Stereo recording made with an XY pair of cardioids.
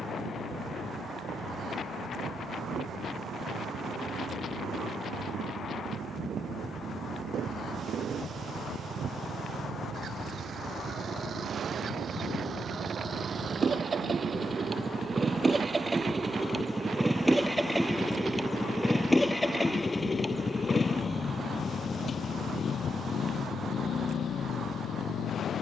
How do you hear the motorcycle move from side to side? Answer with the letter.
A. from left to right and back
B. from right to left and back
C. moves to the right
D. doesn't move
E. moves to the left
E.